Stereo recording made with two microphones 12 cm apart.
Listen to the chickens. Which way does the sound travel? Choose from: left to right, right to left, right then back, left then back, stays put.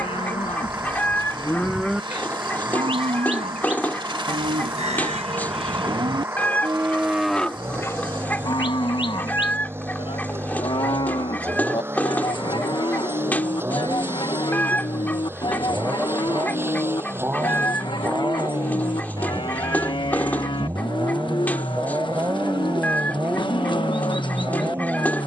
stays put.